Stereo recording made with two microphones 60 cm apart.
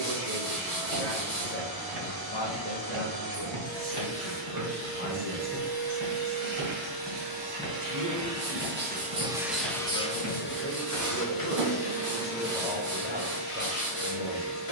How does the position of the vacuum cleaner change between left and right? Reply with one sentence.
In this clip you hear the vacuum cleaner move to the left.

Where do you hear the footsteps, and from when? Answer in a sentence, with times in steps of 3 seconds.
You can hear the footsteps on the right from 0 s, in the centre from 6 s, on the right from 9 s and not at all from 12 s.